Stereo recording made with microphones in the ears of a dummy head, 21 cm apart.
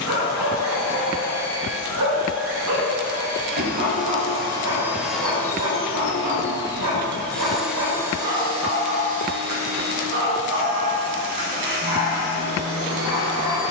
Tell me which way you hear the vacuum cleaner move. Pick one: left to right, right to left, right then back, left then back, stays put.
left then back.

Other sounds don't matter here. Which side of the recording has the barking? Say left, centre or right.
right.